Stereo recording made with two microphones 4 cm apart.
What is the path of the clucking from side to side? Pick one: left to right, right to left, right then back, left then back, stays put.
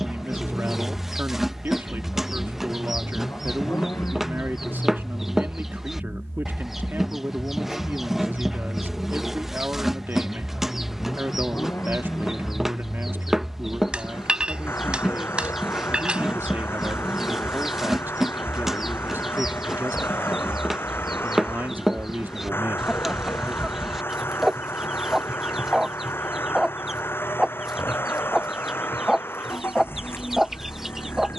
stays put.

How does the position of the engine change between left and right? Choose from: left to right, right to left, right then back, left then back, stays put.
stays put.